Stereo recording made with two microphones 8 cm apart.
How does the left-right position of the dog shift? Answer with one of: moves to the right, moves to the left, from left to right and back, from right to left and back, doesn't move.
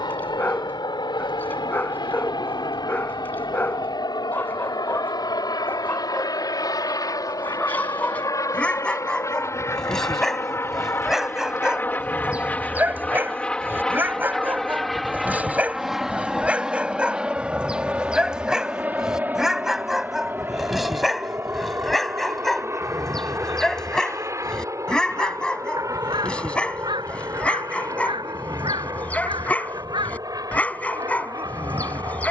from left to right and back.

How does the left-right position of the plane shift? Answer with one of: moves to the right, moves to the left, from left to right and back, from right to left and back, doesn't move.
moves to the right.